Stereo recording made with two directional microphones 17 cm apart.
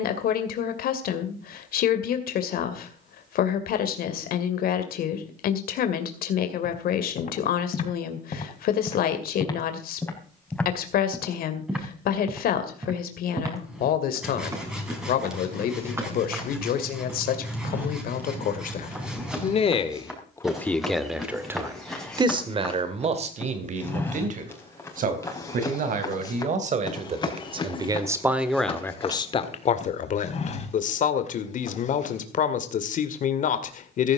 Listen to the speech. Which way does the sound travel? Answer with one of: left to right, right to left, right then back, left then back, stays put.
right then back.